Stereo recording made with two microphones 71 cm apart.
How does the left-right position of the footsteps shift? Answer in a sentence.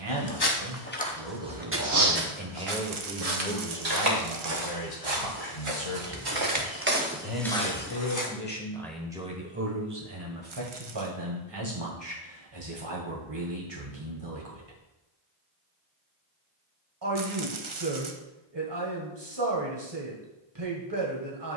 You can hear the footsteps move from left to right and back again.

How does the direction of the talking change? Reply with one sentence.
You can hear the talking go left and come back.